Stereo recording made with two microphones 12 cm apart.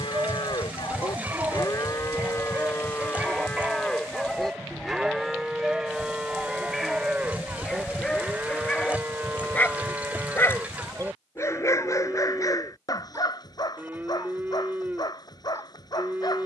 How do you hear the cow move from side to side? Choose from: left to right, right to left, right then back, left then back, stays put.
left to right.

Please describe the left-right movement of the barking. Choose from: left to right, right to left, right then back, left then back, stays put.
right to left.